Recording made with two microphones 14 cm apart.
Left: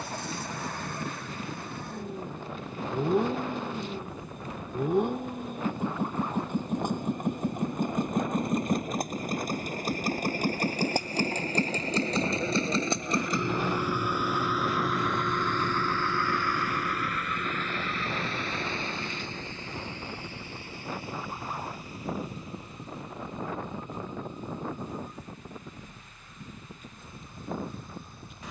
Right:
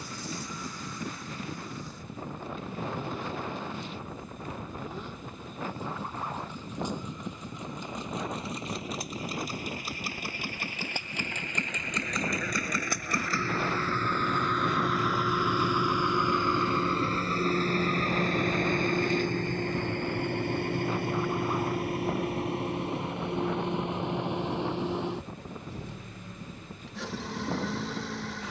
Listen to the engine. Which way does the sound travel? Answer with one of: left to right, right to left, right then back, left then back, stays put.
left to right.